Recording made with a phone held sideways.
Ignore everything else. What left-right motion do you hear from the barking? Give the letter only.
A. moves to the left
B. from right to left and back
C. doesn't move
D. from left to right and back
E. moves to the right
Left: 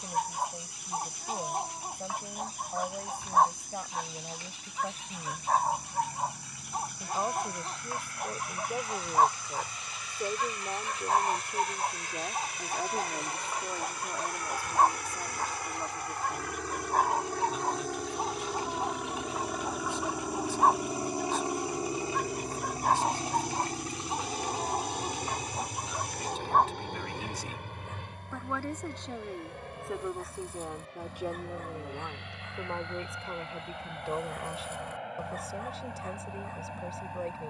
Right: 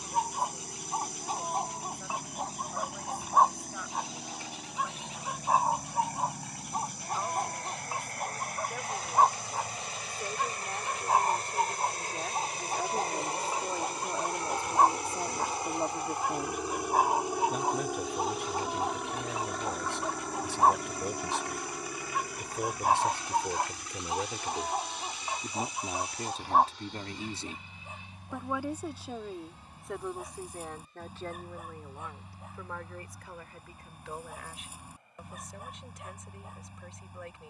C.